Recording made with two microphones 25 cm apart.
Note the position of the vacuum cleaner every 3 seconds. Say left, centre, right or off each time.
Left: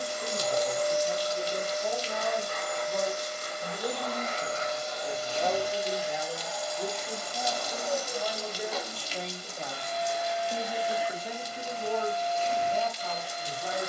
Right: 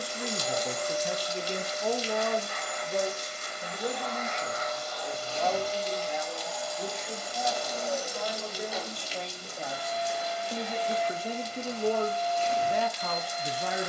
left, left, centre, centre, left.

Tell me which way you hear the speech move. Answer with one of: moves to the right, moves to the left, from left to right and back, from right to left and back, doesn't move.
from right to left and back.